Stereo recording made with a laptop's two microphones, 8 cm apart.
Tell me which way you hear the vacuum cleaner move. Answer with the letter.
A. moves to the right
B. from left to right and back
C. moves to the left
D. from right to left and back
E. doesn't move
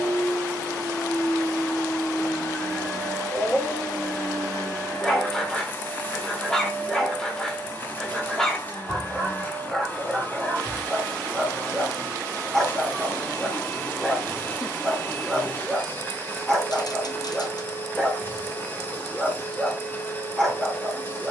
E.